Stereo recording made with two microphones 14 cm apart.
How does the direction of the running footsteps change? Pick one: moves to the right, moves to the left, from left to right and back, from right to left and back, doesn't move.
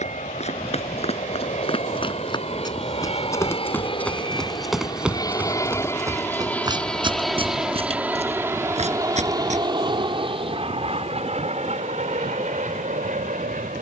moves to the right.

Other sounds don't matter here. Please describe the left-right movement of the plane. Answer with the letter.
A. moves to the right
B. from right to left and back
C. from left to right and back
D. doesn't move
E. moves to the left
A.